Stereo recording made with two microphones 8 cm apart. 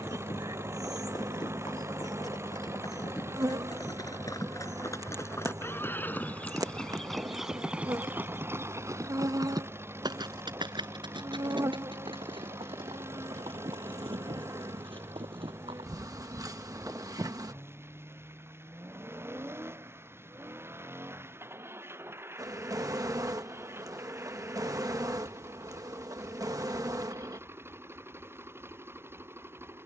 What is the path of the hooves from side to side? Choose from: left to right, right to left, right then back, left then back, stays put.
left to right.